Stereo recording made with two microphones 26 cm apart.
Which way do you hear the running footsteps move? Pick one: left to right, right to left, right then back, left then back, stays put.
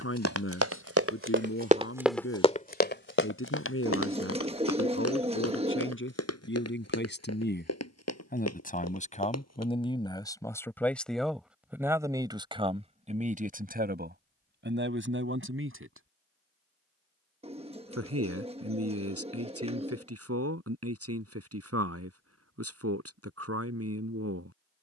right to left.